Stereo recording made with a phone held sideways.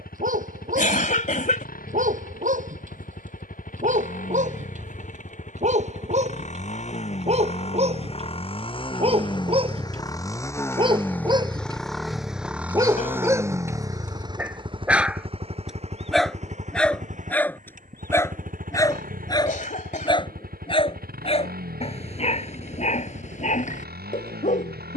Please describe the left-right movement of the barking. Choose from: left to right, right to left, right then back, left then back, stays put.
right to left.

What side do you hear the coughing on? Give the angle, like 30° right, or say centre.
50° left.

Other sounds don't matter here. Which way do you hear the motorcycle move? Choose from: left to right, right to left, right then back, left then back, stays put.
left to right.